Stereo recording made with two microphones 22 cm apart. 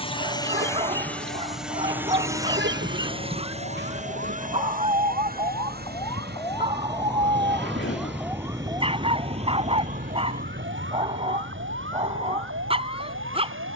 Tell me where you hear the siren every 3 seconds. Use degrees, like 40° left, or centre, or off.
50° left, 40° left, centre, 40° right, 70° right.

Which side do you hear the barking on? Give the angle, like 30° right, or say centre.
30° right.